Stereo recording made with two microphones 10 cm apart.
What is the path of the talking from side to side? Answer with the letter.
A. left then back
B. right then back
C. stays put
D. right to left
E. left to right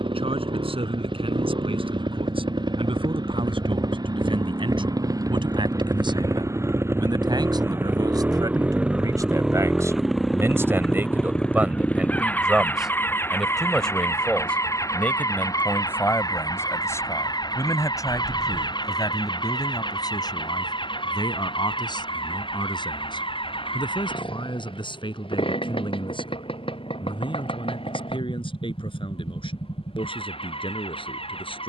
D.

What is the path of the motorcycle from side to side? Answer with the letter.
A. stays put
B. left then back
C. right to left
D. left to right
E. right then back
C.